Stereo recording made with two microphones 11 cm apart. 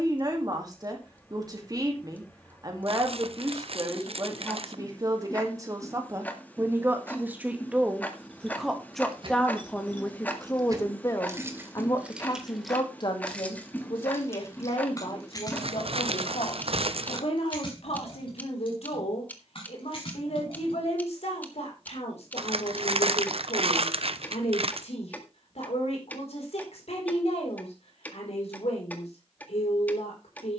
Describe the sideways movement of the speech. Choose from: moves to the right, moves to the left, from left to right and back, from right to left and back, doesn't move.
moves to the left.